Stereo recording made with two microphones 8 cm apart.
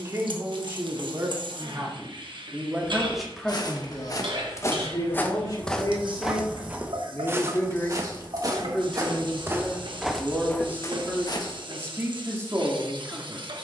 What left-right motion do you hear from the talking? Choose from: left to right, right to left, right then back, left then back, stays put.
left then back.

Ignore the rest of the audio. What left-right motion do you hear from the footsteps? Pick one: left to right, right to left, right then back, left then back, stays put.
right then back.